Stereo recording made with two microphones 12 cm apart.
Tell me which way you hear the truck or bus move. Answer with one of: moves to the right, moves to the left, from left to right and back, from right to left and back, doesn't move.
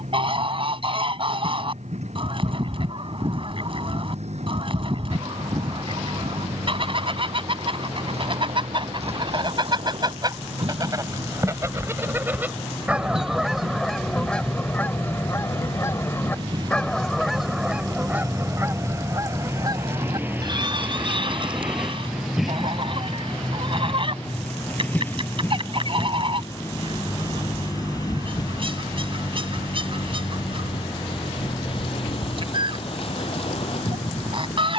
moves to the left.